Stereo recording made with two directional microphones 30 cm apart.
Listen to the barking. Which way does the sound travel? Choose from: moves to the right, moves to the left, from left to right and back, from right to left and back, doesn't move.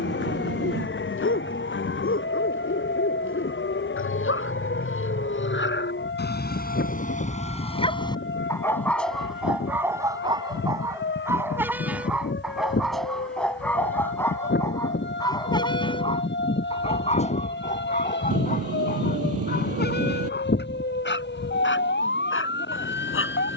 from left to right and back.